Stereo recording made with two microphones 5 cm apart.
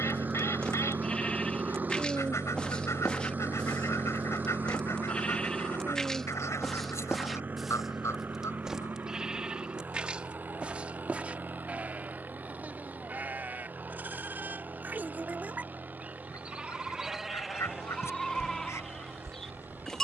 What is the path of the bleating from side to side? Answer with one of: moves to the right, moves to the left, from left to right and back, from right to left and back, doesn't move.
from left to right and back.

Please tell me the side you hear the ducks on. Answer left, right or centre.
left.